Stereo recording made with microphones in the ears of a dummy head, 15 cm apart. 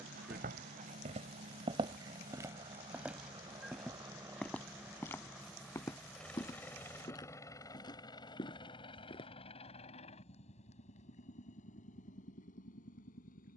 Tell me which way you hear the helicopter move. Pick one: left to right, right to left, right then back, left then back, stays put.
right to left.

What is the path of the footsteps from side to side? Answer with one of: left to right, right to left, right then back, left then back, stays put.
right to left.